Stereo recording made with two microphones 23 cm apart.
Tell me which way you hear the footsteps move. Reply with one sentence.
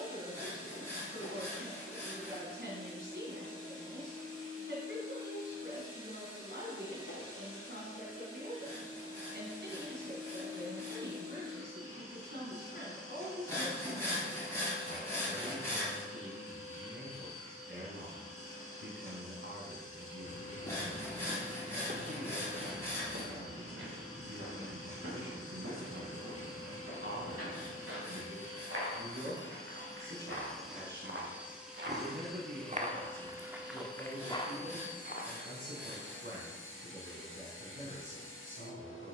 You can hear the footsteps go right and come back.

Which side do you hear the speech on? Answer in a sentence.
You can hear the speech on the right.